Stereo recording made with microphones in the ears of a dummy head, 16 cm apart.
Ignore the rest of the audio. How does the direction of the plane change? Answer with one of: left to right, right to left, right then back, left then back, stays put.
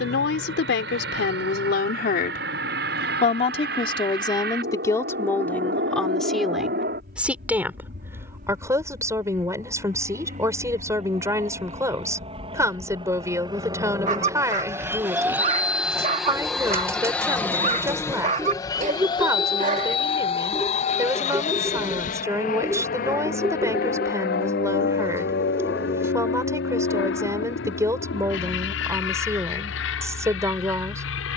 right to left.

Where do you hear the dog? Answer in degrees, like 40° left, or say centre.
40° right.